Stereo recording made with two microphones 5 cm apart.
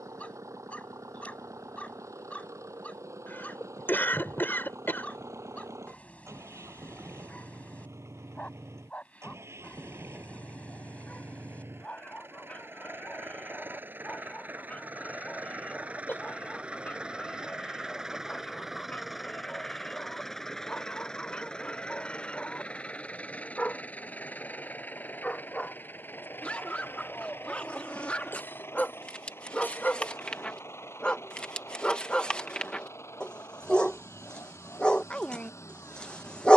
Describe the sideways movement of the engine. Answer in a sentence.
In this clip you hear the engine move to the left.